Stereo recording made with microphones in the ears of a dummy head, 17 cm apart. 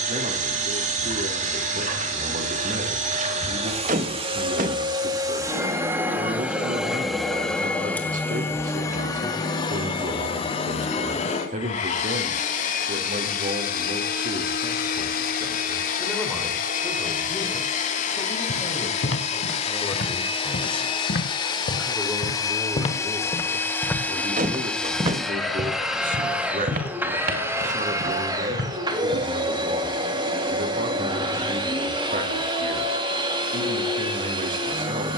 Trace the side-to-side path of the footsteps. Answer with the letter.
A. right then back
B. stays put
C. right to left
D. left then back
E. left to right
E.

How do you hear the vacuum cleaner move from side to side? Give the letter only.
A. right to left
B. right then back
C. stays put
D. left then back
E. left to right
D.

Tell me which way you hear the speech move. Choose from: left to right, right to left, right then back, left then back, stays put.
left then back.